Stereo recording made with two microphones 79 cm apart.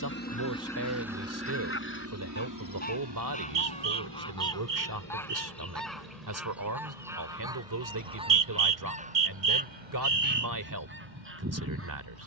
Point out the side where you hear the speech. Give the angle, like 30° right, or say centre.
20° right.